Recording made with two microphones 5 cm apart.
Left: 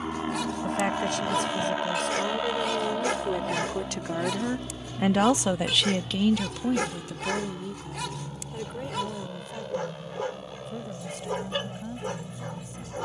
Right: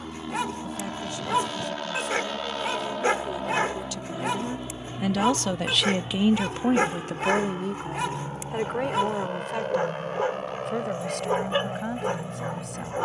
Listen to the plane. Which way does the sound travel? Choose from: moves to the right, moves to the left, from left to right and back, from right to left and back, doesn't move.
moves to the right.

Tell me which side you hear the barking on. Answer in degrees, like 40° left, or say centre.
30° right.